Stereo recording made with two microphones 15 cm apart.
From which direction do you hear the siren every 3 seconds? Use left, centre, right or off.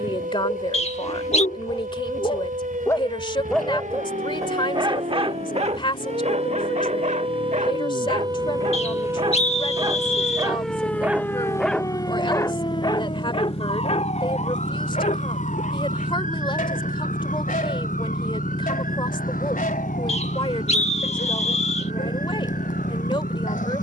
right, right, right, centre, left, left, left, left.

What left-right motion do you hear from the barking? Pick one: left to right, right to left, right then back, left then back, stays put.
right then back.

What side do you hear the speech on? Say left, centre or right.
left.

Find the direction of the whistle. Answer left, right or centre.
left.